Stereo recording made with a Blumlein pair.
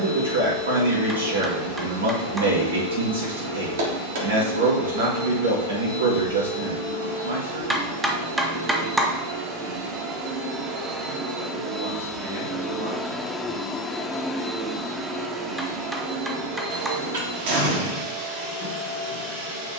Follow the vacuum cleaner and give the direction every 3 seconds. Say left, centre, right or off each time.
right, right, right, right, centre, right, right.